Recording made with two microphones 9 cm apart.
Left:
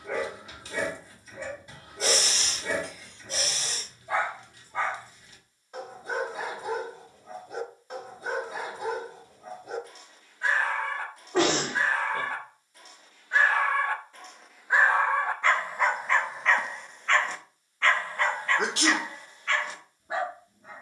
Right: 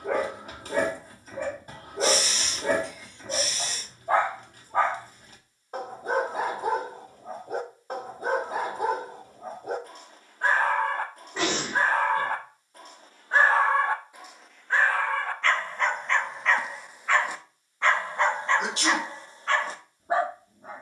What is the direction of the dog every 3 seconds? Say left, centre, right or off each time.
right, right, right, right, right, centre, right.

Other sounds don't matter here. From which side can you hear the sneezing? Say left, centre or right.
left.